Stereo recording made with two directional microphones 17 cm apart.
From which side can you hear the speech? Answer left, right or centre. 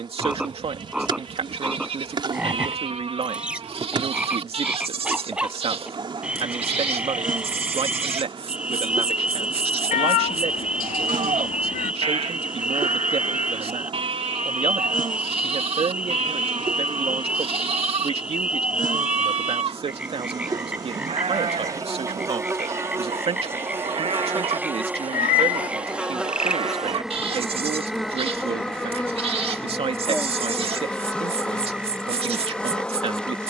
right.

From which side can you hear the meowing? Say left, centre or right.
left.